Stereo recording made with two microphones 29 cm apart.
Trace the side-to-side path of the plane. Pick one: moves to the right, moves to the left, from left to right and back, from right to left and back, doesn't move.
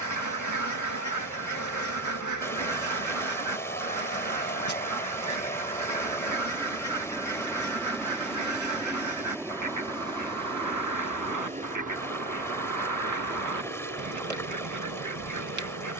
moves to the right.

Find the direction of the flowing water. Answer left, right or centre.
centre.